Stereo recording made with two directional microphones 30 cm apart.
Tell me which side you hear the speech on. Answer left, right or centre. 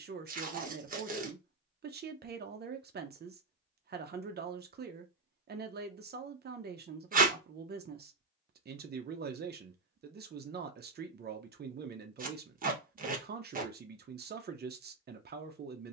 right.